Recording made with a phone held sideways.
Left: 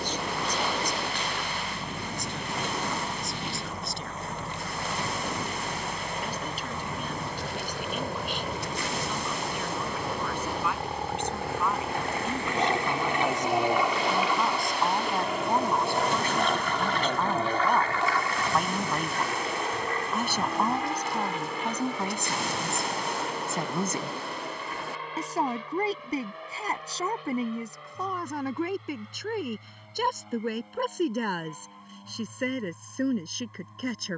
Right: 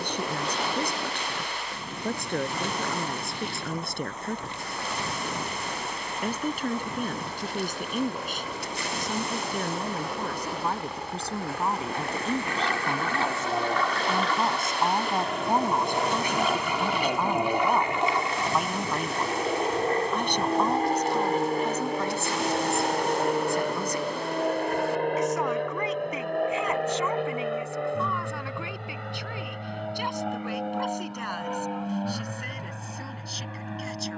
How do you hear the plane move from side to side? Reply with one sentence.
You can hear the plane go from the left side to the right.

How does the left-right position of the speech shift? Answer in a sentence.
You can hear the speech move to the left.